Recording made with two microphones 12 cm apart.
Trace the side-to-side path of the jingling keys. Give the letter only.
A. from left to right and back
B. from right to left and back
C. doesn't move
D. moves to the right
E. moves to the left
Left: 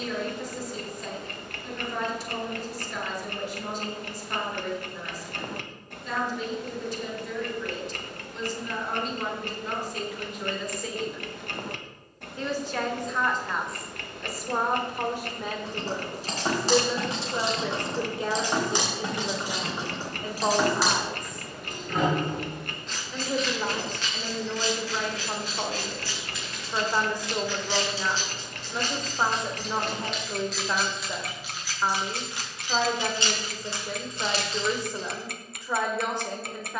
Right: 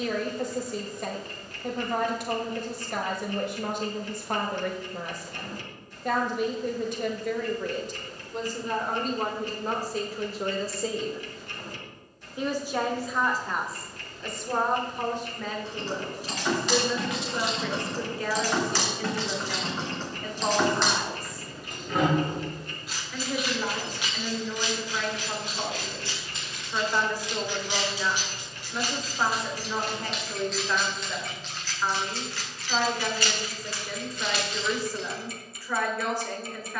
A.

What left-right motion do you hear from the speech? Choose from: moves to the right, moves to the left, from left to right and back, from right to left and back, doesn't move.
moves to the left.